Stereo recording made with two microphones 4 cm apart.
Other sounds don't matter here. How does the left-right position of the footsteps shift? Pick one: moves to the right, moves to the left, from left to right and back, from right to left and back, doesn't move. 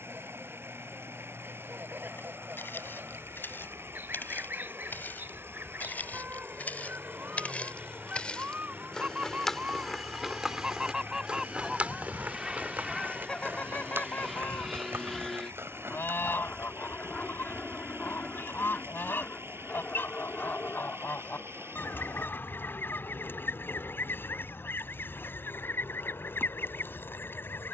moves to the right.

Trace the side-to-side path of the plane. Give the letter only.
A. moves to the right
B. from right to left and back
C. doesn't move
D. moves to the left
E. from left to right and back
D.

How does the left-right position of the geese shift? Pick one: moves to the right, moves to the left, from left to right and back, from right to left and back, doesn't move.
moves to the left.